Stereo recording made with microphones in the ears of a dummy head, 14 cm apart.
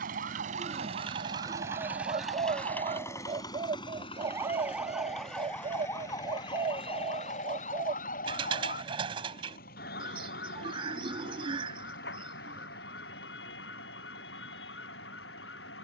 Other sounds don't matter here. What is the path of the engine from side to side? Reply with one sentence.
You can hear the engine move to the left.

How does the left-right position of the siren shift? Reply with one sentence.
In this clip you hear the siren move from right to left.